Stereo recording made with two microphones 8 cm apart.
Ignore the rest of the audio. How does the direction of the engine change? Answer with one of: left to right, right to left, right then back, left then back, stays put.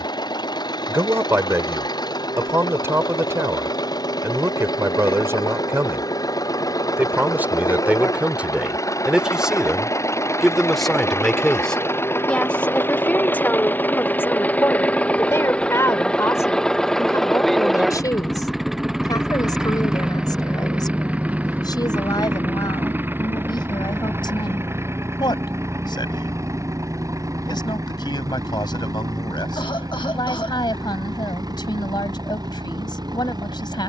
left to right.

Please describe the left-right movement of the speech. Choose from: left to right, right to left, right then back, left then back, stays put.
right to left.